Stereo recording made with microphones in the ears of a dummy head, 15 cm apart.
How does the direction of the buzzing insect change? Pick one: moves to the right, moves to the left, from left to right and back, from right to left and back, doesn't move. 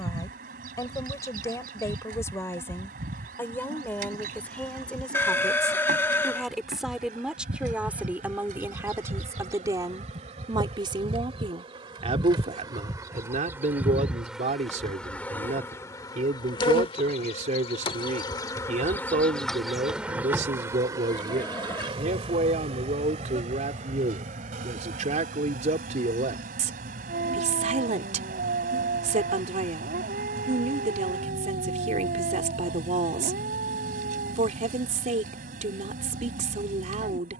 from right to left and back.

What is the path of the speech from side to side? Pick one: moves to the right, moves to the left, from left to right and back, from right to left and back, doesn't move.
moves to the right.